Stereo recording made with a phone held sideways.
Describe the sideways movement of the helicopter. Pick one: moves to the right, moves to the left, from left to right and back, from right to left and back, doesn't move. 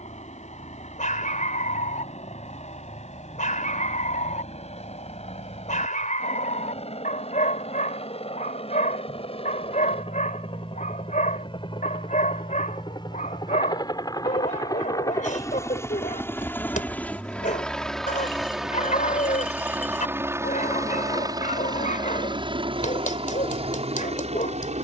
moves to the right.